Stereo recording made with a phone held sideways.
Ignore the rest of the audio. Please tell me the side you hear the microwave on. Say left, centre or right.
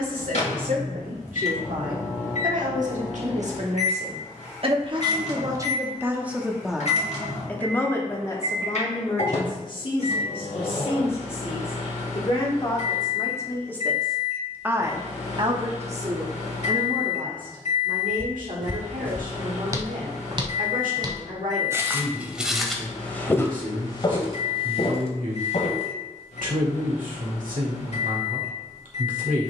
left.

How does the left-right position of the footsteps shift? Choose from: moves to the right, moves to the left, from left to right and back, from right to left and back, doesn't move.
from left to right and back.